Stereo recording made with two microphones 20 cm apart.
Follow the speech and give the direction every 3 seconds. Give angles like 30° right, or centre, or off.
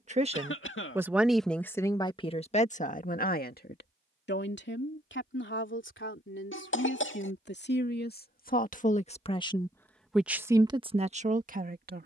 10° left, 60° left, 60° left, 10° right.